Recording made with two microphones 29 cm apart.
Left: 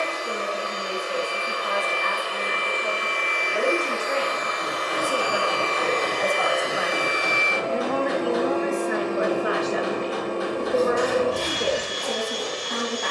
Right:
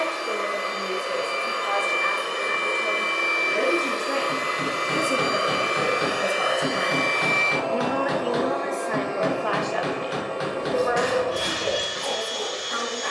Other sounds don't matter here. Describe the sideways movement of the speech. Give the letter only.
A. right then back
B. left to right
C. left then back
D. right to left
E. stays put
D.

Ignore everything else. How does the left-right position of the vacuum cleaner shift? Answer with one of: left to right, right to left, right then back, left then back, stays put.
right to left.